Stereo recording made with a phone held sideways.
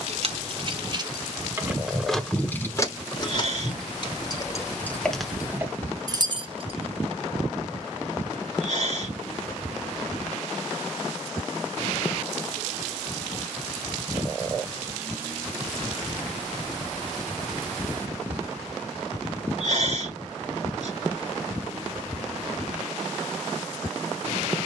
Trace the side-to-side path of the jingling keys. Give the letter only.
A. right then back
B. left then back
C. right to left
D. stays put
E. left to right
B.